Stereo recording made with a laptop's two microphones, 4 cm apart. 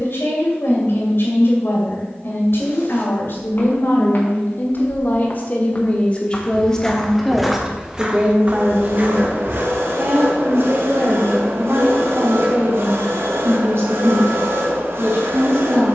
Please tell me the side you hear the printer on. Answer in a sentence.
In this clip you hear the printer on the right.